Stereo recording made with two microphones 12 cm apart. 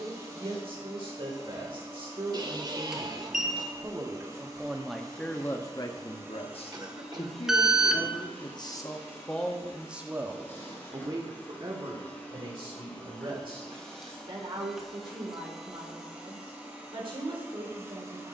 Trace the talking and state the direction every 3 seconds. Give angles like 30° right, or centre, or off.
50° right, 10° right, 50° left, 20° right, 50° right, 50° right.